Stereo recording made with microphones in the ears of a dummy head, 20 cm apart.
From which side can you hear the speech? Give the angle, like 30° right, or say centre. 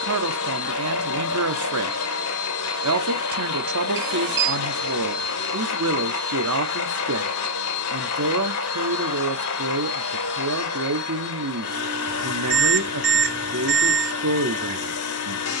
70° right.